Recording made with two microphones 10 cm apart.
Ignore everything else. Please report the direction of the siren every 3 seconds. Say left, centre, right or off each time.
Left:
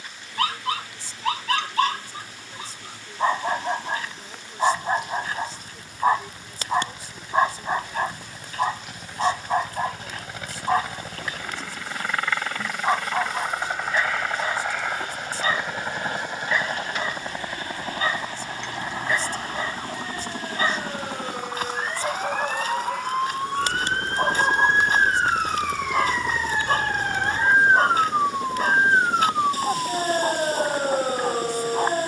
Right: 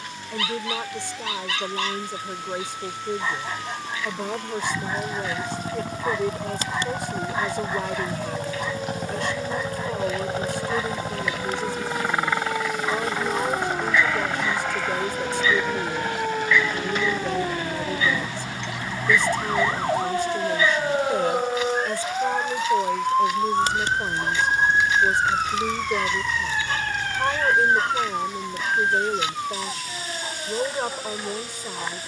right, right, right, right, right, right, right, right, centre, left, left.